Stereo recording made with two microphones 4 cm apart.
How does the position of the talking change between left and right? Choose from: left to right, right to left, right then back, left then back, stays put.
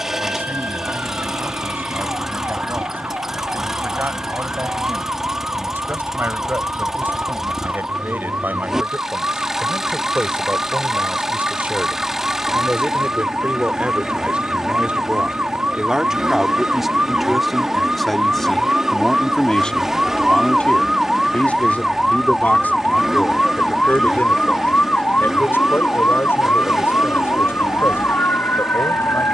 right to left.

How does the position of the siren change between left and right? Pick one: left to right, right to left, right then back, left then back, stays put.
right to left.